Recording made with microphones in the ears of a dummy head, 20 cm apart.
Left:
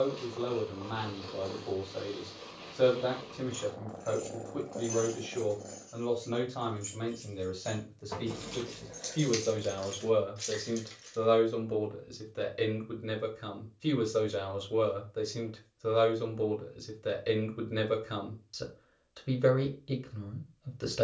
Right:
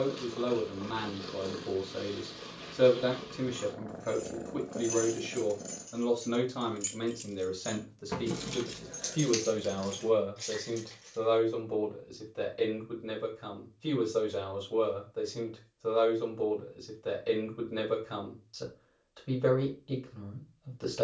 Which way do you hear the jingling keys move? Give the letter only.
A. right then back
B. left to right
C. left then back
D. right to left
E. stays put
A.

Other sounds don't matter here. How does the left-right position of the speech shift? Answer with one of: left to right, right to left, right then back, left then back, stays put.
right to left.